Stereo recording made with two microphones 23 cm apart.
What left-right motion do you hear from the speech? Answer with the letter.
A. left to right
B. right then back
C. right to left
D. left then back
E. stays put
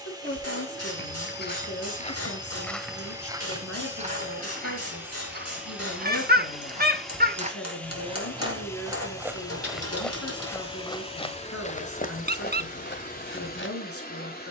E.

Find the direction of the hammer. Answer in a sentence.
You can hear the hammer on the left.